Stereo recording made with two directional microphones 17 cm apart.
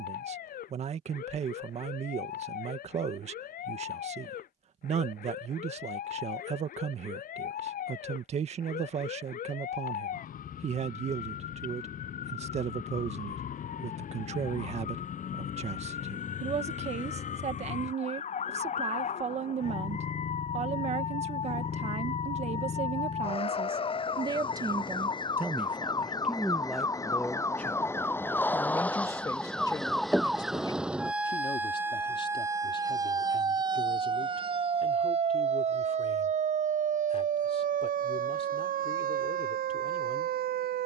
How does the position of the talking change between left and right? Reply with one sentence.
You can hear the talking travel towards the left.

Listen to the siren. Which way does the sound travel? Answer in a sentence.
In this clip you hear the siren travel towards the right.